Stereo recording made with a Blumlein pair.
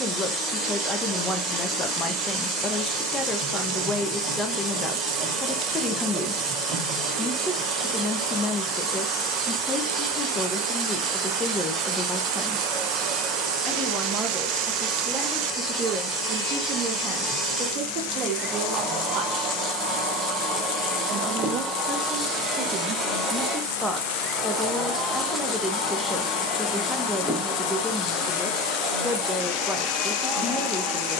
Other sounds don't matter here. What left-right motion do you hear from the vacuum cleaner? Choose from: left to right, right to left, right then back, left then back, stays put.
right to left.